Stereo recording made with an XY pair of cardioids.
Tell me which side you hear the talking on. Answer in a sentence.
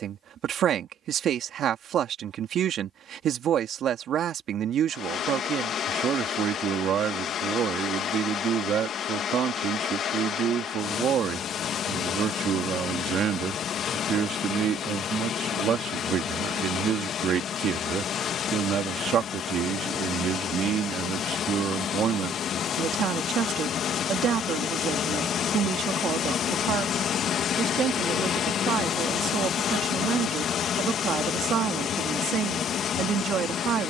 In this clip you hear the talking on the right.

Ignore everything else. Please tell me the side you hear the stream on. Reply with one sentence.
You can hear the stream on the left.